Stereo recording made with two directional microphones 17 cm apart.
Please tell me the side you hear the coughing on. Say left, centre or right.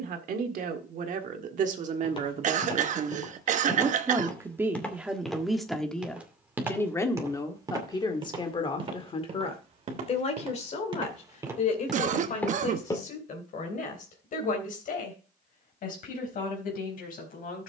right.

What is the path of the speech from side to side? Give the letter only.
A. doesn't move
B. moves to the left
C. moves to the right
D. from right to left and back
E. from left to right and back
B.